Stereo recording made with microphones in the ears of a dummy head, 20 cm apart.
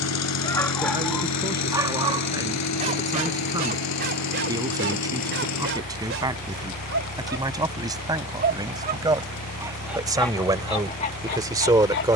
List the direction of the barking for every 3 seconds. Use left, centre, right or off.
centre, right, right, left.